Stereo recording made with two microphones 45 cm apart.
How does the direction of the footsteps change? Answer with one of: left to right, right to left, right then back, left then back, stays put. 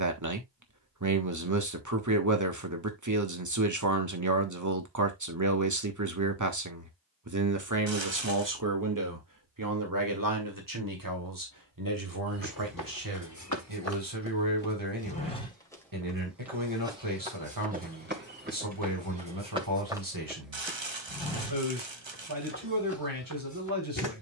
right then back.